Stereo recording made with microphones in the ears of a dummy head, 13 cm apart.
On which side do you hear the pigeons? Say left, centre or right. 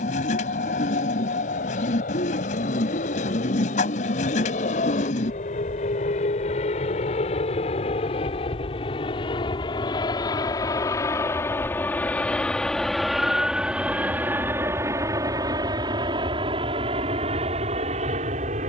left.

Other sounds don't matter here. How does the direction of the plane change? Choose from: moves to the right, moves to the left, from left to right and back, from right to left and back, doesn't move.
moves to the right.